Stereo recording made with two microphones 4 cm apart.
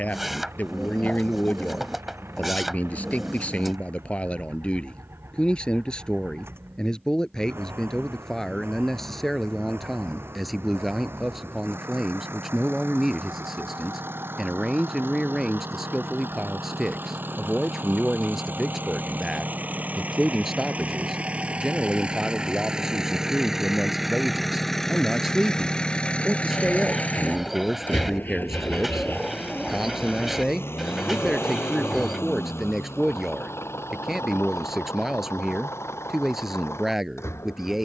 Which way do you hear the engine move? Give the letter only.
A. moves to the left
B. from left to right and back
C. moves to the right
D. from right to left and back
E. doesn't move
A.